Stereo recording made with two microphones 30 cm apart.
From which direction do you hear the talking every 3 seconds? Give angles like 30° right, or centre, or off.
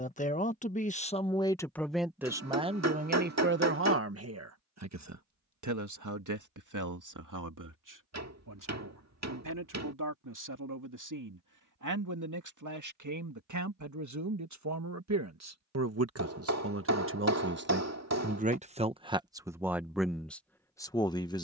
10° left, 50° right, 70° right, 80° right, 70° right, 50° right, 10° right.